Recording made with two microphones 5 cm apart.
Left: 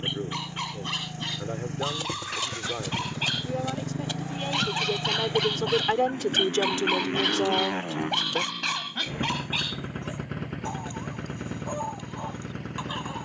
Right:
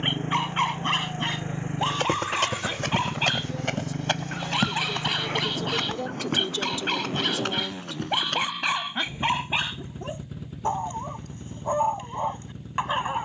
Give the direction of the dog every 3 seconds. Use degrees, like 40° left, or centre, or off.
30° right, 10° right, centre, 30° right, 40° right.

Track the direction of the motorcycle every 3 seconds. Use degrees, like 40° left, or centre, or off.
30° right, 10° left, 40° left, 60° left, 70° left.